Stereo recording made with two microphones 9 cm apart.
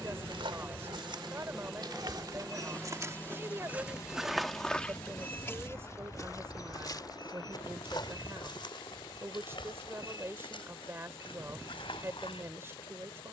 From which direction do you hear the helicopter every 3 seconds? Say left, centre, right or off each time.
centre, left, left, left, left.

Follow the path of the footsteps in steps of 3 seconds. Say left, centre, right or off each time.
right, centre, left, left, left.